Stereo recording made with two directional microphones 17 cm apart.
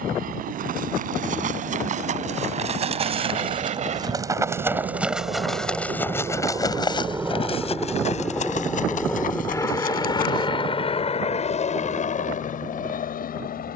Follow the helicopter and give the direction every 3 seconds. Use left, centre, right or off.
right, right, centre, left, left.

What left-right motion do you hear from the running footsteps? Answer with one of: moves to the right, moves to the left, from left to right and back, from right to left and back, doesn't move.
moves to the left.